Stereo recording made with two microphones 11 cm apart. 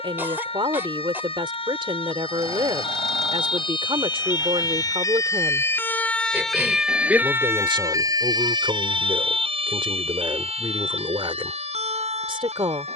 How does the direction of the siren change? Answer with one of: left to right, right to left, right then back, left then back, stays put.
left to right.